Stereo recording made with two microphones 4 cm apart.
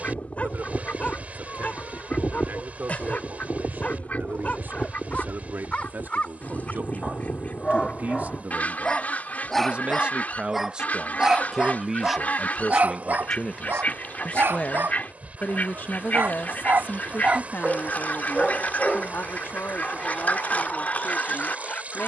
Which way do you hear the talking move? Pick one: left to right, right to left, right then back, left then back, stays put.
right to left.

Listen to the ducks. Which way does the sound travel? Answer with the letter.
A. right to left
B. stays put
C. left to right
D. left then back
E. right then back
B.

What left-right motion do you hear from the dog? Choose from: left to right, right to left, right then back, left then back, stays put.
right then back.